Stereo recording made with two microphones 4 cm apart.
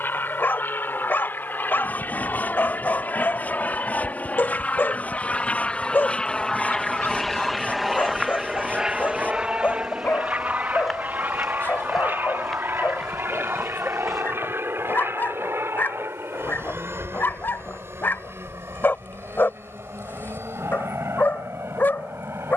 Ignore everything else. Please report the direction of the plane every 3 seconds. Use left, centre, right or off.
left, left, centre, right, right, right, right, right.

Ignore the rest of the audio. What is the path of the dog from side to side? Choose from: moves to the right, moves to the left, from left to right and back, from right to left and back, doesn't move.
doesn't move.